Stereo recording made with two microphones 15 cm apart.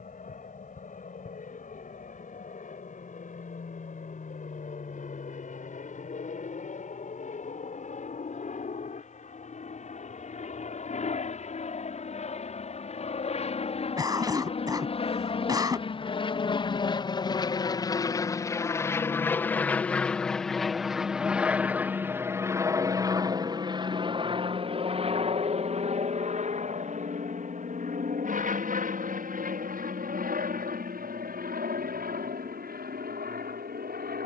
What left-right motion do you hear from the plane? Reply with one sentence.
You can hear the plane go from the left side to the right.